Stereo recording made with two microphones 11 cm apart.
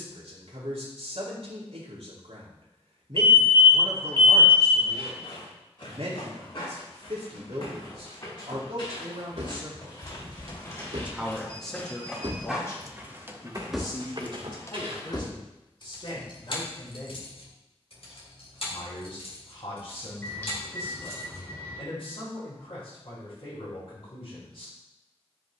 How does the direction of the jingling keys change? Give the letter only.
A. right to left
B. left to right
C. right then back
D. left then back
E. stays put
A.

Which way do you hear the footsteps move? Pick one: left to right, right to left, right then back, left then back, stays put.
left to right.